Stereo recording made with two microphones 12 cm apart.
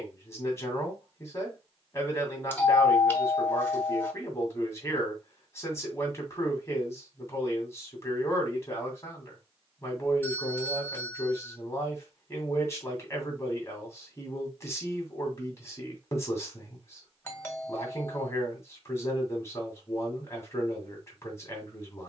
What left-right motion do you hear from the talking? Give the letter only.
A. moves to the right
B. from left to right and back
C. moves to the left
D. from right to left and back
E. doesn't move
E.